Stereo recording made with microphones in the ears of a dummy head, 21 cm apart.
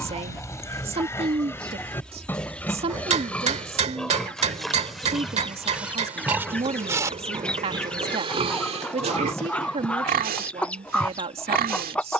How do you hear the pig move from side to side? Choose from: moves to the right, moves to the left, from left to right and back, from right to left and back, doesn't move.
moves to the right.